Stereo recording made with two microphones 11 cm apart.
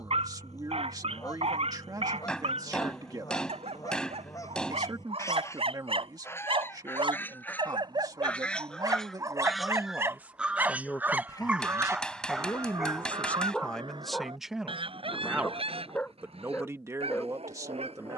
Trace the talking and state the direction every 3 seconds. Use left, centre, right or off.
right, right, right, centre, centre, right.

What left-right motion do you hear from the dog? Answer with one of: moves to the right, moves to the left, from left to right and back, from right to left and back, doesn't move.
moves to the left.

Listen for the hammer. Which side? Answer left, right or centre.
centre.